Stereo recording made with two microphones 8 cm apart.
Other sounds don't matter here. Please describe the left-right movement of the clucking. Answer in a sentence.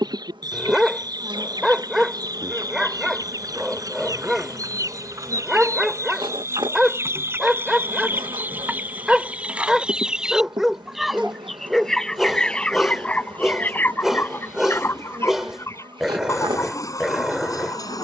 In this clip you hear the clucking move from right to left.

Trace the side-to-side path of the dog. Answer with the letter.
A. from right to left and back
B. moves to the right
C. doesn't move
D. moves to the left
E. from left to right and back
C.